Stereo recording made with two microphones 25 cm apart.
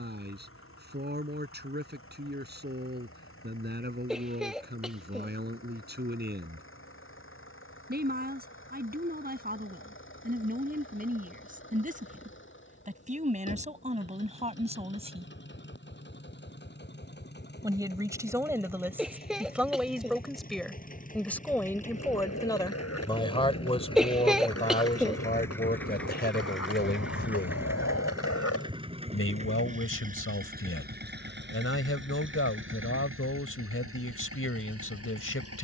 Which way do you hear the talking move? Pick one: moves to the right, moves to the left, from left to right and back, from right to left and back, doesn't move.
moves to the left.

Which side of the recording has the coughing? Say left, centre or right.
centre.